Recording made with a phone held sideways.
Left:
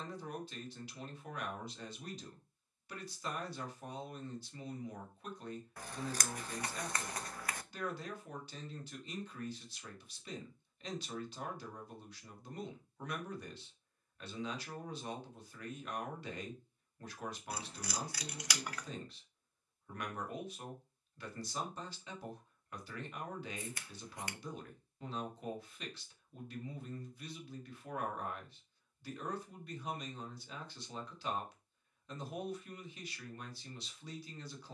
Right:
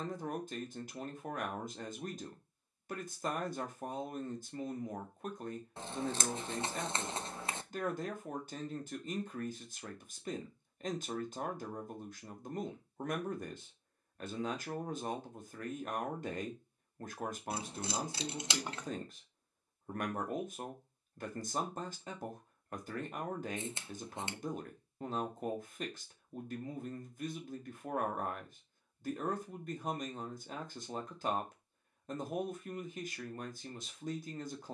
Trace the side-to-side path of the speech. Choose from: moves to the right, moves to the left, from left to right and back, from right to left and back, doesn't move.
doesn't move.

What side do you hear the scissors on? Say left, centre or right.
right.